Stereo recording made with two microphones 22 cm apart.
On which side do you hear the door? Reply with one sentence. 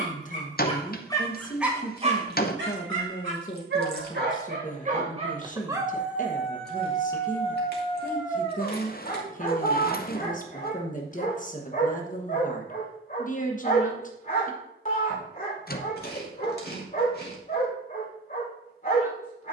You can hear the door on the left.